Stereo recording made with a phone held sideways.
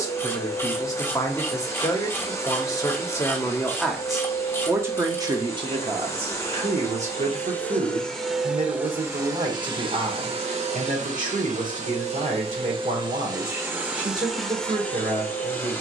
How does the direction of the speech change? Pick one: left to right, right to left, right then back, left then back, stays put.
left to right.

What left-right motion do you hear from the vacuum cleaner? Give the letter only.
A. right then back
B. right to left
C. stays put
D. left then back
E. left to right
A.